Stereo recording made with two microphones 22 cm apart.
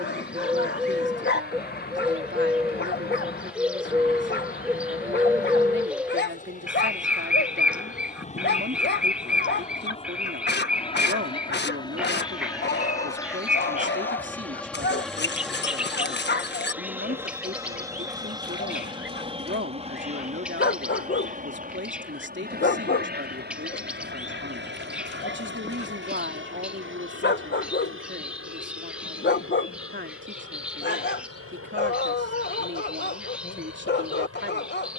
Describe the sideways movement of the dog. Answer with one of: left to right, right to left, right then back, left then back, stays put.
stays put.